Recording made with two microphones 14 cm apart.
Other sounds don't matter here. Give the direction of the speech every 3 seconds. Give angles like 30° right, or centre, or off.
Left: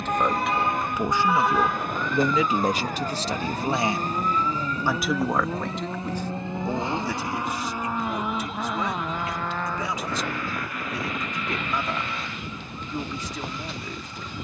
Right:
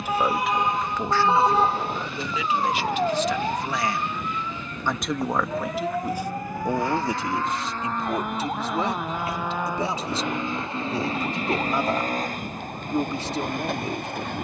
20° left, 10° left, 20° right, 30° right, 30° right.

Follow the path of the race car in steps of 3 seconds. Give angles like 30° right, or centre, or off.
50° left, 40° left, 10° left, 20° right, 50° right.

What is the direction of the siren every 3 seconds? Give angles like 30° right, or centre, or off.
30° right, 40° right, 50° right, 50° right, 50° right.